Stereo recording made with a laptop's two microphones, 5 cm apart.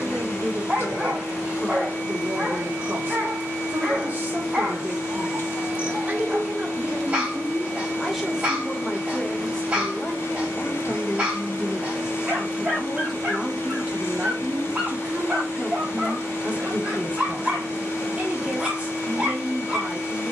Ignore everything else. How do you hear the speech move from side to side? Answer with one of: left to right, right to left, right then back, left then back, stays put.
left then back.